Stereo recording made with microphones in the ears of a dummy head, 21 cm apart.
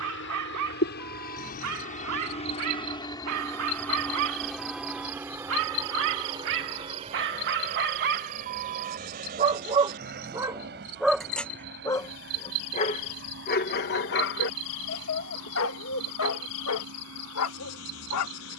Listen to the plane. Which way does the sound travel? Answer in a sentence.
You can hear the plane travel towards the right.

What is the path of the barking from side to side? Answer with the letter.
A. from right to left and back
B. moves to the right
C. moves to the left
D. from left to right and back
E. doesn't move
C.